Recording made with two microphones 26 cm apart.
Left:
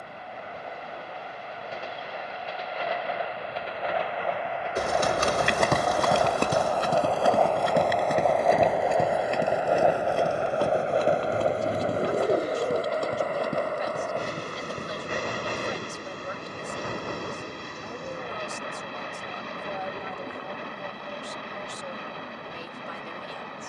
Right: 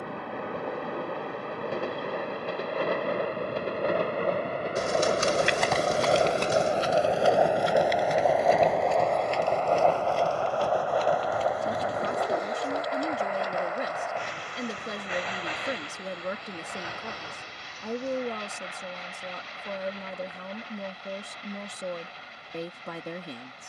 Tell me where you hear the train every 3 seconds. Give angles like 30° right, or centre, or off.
60° right, 40° right, 10° right, 20° left, 40° left, 50° left, 60° left, 60° left.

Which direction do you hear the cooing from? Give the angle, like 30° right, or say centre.
60° left.